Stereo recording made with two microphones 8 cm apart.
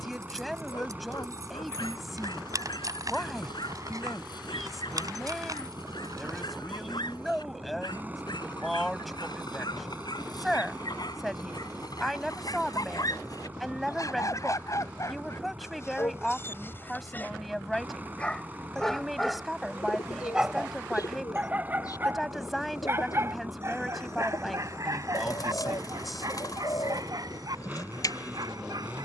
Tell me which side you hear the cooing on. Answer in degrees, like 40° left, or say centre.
50° left.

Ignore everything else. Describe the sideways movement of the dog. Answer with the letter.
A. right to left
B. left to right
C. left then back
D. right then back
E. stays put
B.